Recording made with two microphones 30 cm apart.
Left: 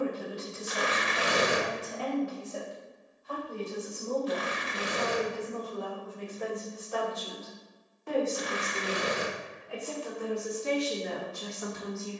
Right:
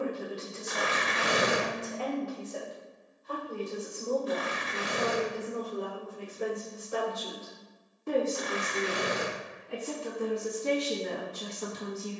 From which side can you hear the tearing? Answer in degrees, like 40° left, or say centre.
60° right.